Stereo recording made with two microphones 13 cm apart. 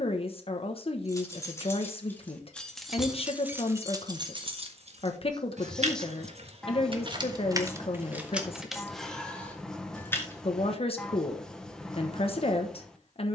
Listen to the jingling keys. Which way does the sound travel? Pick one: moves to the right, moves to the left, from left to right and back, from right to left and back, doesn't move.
from left to right and back.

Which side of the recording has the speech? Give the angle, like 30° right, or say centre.
50° left.